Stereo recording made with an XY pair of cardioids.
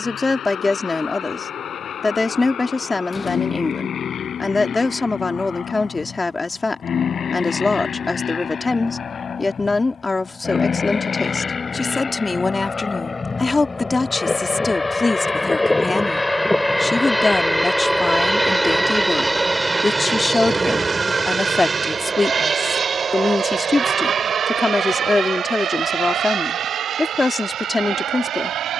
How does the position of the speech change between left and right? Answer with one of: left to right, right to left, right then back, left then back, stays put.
stays put.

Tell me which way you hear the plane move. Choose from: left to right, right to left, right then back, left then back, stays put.
left to right.